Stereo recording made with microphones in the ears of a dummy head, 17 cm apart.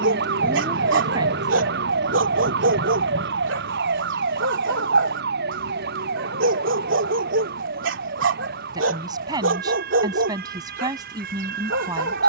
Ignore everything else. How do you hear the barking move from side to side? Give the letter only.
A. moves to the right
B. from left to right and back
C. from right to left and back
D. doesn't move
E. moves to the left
D.